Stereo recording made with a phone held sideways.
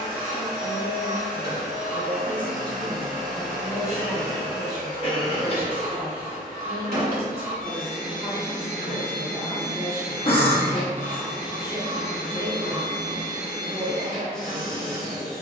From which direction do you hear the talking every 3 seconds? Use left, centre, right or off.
left, right, right, right, right.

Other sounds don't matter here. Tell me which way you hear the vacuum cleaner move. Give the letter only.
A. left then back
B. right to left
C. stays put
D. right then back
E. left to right
C.